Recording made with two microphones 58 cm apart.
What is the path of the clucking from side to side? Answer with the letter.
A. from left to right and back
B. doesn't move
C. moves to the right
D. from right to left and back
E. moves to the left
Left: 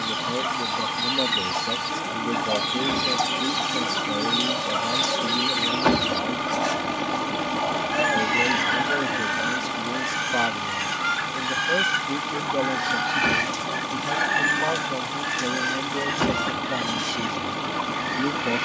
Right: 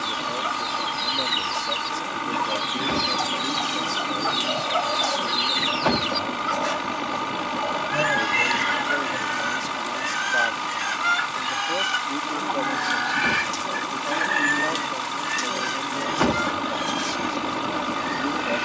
A.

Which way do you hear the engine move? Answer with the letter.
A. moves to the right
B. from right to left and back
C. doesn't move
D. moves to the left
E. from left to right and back
C.